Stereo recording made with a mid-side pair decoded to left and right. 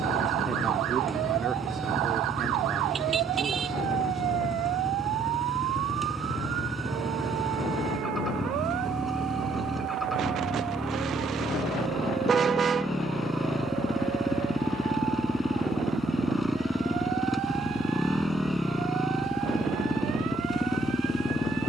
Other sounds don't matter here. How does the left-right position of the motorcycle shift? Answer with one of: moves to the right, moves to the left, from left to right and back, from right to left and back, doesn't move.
doesn't move.